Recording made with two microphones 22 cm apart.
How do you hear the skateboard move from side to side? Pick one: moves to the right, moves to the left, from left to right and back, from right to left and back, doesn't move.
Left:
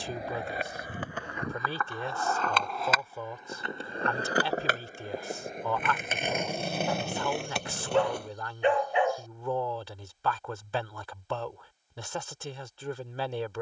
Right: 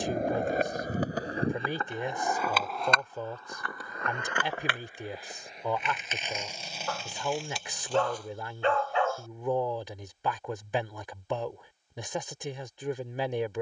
moves to the left.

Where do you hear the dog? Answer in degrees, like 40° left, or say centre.
20° left.